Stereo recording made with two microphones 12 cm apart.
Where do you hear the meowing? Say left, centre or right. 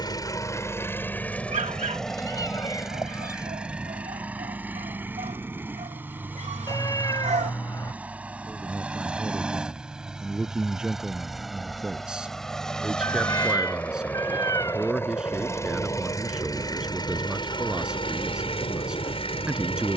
left.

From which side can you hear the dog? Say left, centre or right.
right.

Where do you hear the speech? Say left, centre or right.
centre.